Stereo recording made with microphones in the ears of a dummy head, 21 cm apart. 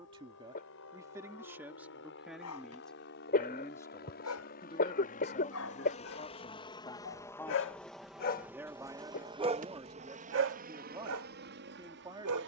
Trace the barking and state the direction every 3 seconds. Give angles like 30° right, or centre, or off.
80° left, 80° left, 50° left, 50° right.